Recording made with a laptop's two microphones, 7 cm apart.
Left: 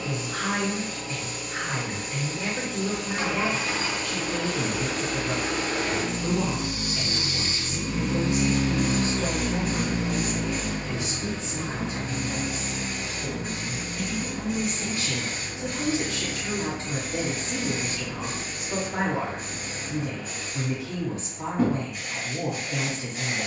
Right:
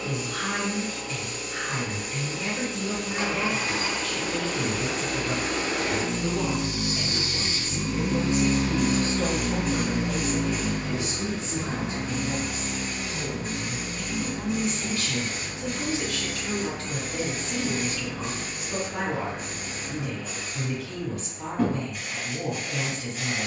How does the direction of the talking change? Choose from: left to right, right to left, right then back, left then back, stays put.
right then back.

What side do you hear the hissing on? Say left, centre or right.
centre.